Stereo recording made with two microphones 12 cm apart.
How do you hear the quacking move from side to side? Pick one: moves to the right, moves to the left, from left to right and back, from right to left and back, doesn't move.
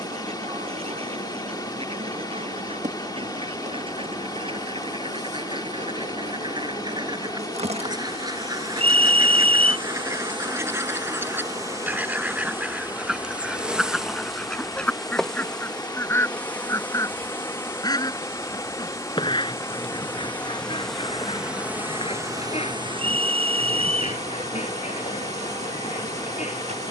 moves to the left.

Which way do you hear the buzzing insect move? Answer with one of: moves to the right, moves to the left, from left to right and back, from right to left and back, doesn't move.
from right to left and back.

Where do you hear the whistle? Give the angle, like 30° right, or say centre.
60° right.